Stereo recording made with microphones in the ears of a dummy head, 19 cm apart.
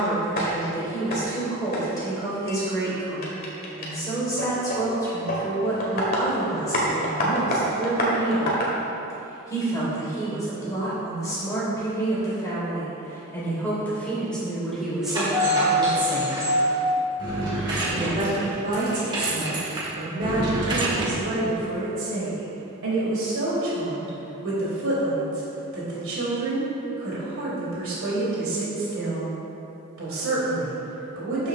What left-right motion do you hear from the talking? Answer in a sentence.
In this clip you hear the talking move to the right.